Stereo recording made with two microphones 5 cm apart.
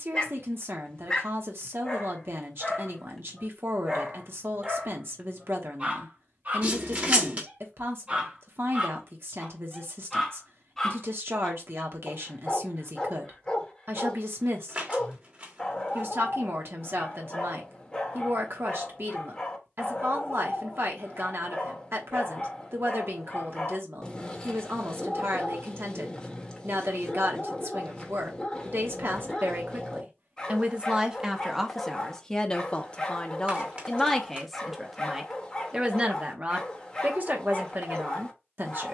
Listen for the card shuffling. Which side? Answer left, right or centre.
right.